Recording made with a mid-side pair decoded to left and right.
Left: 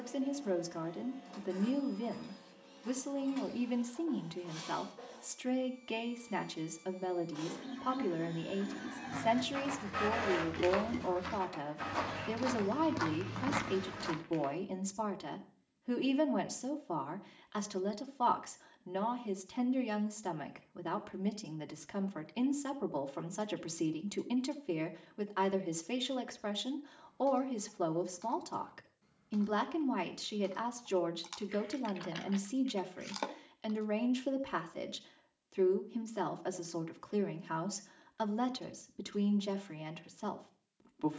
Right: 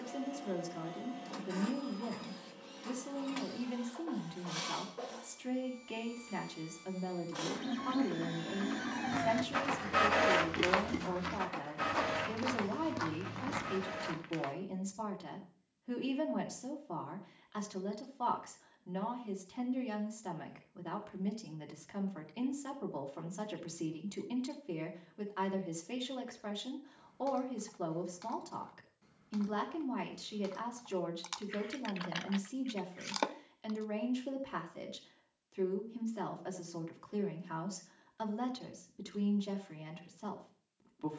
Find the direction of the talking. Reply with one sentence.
In this clip you hear the talking on the left.